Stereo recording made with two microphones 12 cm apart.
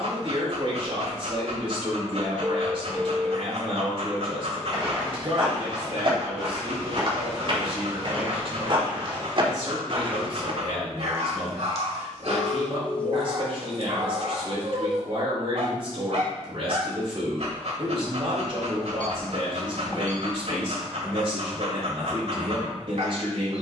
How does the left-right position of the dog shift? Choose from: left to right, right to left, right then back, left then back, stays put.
stays put.